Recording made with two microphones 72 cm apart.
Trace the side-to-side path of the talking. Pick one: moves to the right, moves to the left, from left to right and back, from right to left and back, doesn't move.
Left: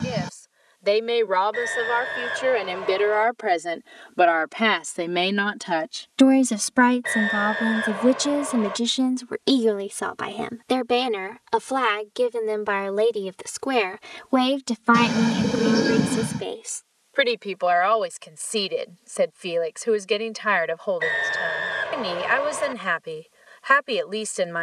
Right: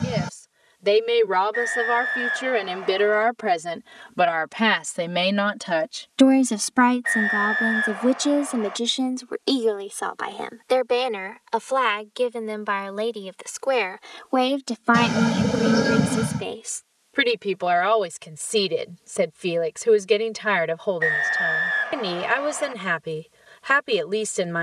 from right to left and back.